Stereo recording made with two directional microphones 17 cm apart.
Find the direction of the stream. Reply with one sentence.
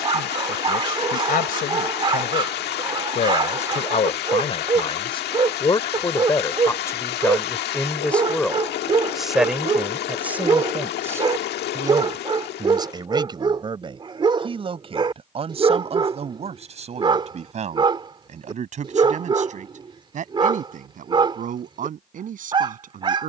You can hear the stream on the left.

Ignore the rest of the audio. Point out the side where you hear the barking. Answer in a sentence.
In this clip you hear the barking on the right.